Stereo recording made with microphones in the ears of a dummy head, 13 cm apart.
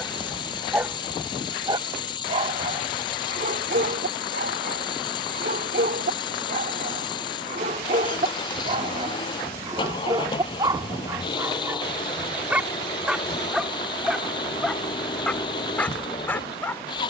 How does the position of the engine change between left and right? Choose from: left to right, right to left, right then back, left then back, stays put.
stays put.